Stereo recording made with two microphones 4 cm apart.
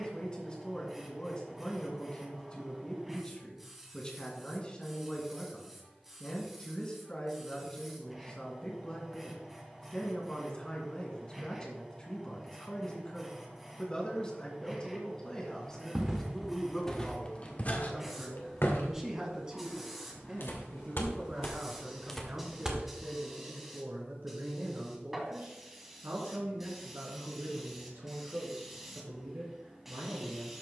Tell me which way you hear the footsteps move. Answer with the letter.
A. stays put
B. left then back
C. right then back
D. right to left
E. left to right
B.